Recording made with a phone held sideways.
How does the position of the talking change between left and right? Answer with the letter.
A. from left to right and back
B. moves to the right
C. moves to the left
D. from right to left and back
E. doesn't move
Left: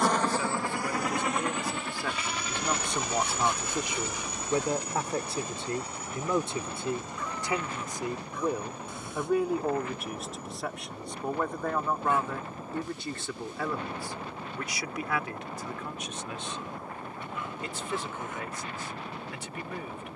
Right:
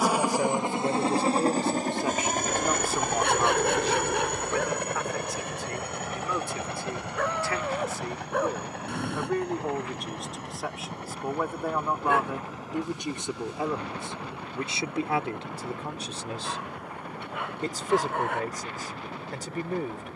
D.